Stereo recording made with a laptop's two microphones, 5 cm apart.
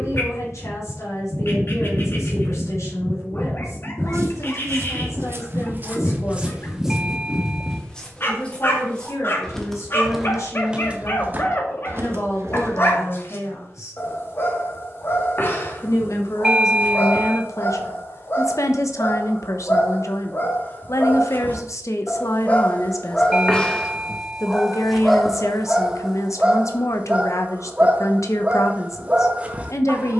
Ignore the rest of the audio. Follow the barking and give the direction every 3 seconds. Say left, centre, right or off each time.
left, left, left, left, left, left, left, left, centre, right.